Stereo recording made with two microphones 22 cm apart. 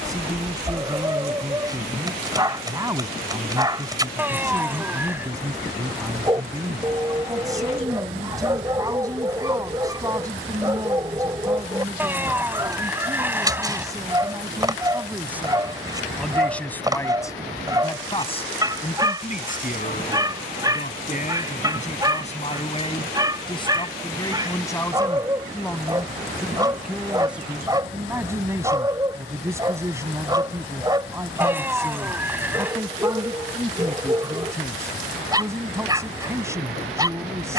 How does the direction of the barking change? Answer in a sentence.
In this clip you hear the barking stay put.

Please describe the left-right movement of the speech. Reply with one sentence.
In this clip you hear the speech move from right to left and back again.